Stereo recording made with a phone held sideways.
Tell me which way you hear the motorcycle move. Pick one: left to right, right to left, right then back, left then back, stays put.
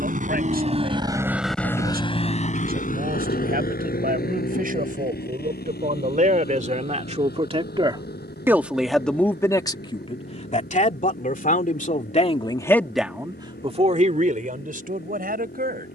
right to left.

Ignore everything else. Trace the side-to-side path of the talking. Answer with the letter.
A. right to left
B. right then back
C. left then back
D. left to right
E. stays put
C.